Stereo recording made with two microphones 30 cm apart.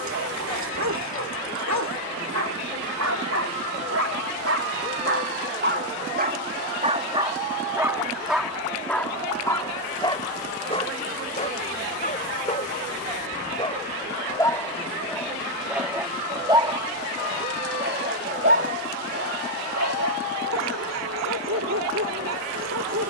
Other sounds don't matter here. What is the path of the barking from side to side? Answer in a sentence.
In this clip you hear the barking go left and come back.